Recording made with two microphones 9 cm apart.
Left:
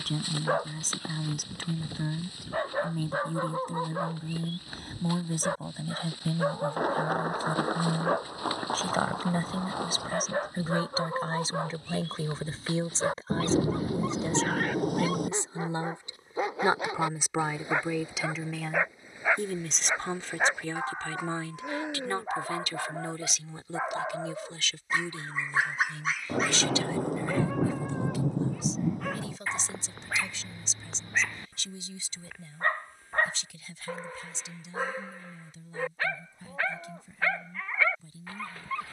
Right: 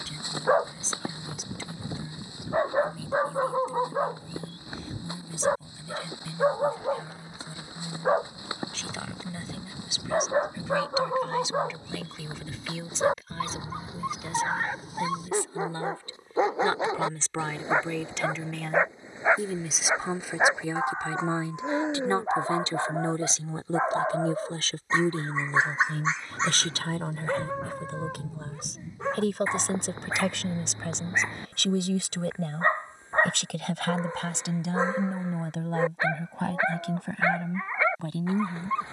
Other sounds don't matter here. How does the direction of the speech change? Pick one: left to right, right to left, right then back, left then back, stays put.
left to right.